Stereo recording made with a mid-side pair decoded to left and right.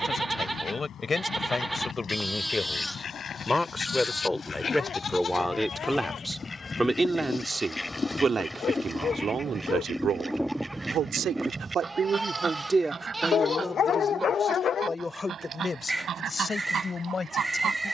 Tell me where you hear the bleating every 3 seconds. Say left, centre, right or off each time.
centre, left, left, centre, centre, centre.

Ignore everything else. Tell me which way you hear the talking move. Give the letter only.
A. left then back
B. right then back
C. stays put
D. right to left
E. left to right
B.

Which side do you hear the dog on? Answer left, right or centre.
left.